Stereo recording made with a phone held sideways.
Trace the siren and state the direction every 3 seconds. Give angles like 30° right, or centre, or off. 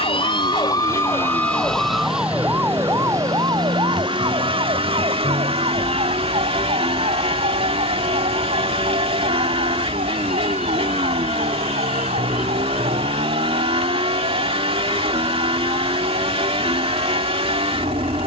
10° left, 30° right, 50° right, 60° right, 60° right, 60° right.